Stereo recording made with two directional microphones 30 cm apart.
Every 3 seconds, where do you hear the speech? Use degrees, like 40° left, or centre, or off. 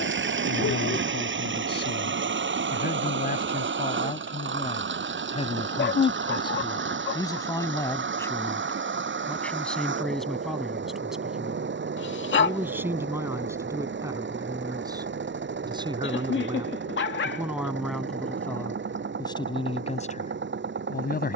30° left, 20° left, 10° left, centre, 10° right, 10° right, 10° left.